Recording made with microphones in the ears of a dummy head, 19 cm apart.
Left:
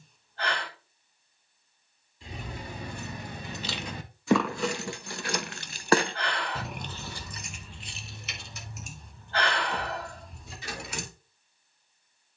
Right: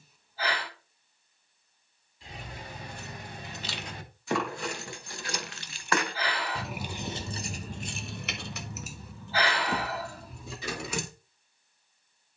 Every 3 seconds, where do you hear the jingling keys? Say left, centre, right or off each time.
left, left, right, right.